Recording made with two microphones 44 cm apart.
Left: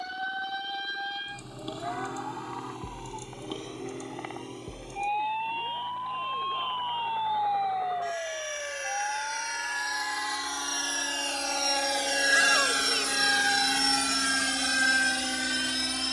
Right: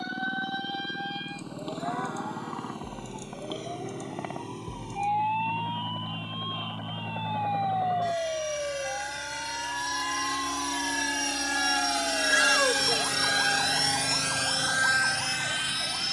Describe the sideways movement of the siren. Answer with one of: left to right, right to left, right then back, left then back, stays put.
left to right.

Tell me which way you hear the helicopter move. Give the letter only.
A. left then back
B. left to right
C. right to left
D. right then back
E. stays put
C.